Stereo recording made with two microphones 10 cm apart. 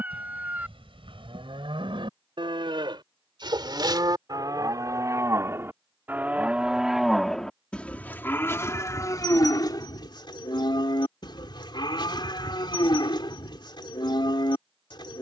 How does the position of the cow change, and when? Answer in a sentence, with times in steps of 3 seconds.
You can hear the cow on the right from 0 s, in the centre from 6 s and on the left from 9 s.